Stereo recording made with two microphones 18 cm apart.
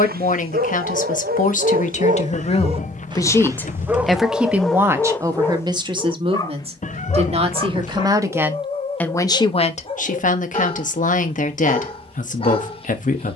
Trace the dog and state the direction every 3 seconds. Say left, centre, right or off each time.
right, centre, left, left, left.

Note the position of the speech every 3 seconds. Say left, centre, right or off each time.
left, centre, right, left, left.